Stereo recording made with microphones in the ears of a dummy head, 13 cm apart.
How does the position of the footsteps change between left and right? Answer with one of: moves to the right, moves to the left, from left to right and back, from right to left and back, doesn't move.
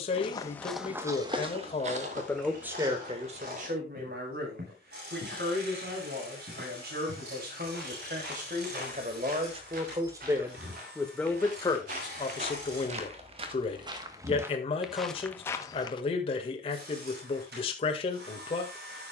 from left to right and back.